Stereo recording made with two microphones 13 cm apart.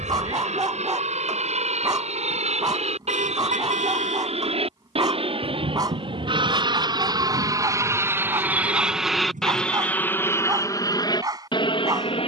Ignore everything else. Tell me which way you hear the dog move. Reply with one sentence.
In this clip you hear the dog stay in one place.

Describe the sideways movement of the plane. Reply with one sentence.
You can hear the plane move to the left.